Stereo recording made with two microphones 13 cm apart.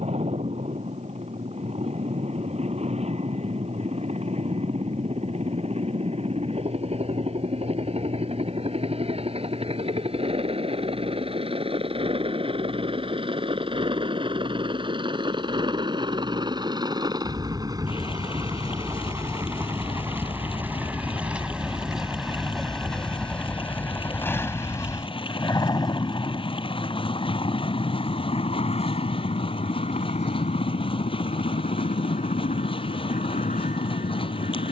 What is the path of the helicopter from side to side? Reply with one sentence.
You can hear the helicopter move to the left.